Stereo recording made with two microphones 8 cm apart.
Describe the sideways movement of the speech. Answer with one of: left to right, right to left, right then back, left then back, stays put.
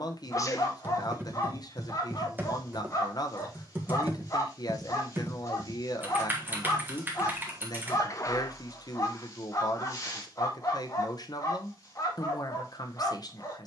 stays put.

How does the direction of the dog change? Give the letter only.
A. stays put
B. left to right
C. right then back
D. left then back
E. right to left
A.